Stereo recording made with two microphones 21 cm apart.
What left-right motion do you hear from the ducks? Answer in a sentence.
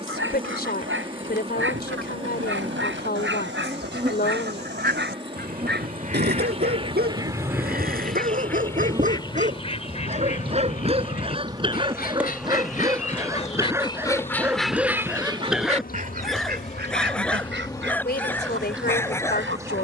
In this clip you hear the ducks go left and come back.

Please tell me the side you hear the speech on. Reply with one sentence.
In this clip you hear the speech on the left.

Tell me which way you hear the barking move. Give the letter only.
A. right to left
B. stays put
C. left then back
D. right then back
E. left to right
A.